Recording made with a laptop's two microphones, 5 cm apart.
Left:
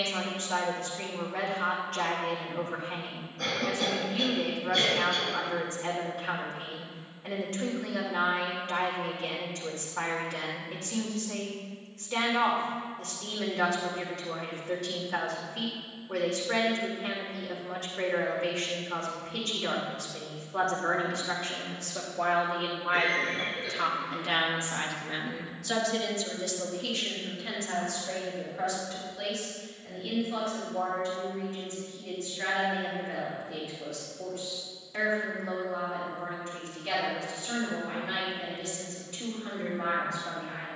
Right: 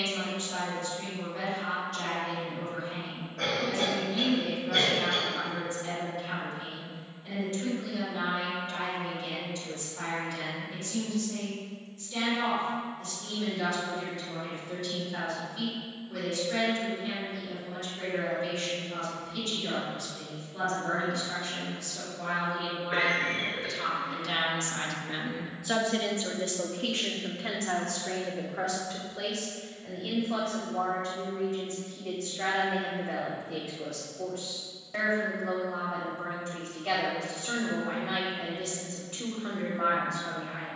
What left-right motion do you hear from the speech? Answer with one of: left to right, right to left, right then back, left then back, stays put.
left to right.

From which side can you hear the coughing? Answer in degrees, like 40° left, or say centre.
80° right.